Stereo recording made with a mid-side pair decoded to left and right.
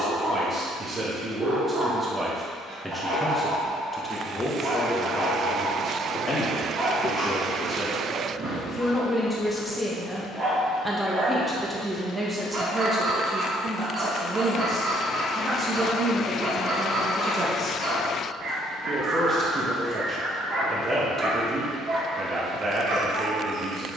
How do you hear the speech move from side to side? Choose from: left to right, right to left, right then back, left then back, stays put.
left then back.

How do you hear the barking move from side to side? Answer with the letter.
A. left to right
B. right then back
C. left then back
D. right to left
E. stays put
E.